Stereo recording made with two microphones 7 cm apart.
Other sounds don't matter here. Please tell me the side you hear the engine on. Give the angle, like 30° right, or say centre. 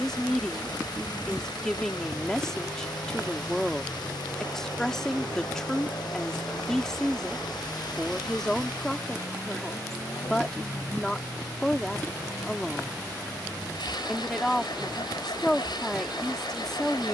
80° left.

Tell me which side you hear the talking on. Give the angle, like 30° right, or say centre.
10° left.